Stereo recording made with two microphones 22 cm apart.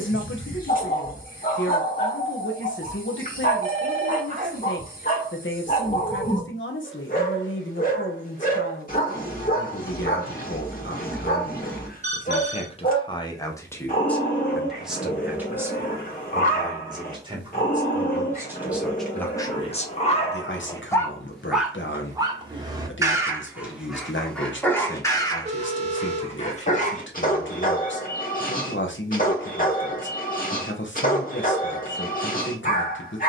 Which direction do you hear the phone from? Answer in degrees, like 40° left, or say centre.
30° right.